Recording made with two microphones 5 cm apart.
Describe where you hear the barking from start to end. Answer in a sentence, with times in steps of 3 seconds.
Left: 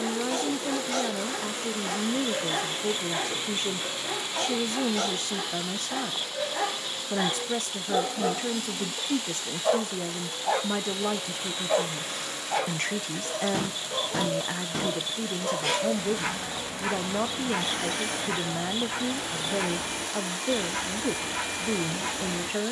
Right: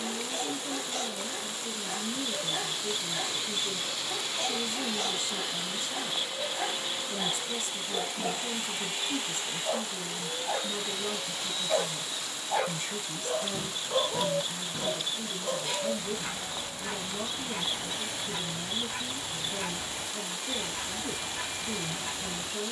In this clip you hear the barking on the left from 0 s, in the centre from 12 s and on the left from 15 s.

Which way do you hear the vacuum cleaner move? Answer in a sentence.
You can hear the vacuum cleaner go right and come back.